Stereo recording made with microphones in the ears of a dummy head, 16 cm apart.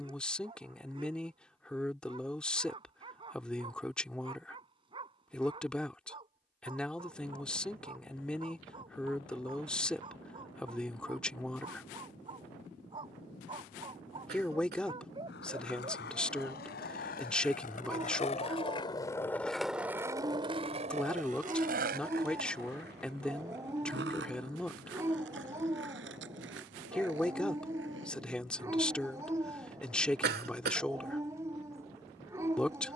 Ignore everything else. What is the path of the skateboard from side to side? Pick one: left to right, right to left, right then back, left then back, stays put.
left to right.